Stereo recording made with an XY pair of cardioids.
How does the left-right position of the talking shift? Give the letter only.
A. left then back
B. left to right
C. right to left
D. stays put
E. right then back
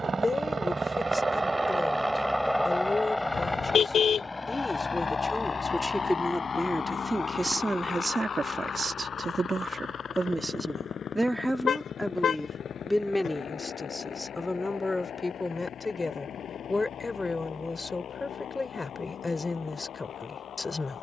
E.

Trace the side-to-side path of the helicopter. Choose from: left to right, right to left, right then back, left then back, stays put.
right to left.